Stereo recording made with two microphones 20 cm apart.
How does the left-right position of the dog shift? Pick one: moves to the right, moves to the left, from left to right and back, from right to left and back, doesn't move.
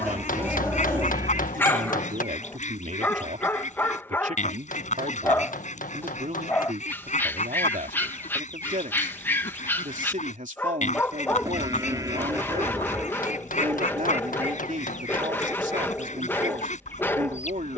doesn't move.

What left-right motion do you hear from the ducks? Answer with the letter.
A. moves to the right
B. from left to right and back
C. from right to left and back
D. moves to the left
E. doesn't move
E.